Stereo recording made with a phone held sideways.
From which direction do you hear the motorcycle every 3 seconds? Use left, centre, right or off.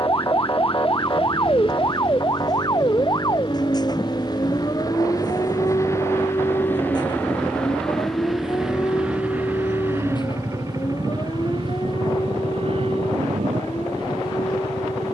left, left, centre, right, right.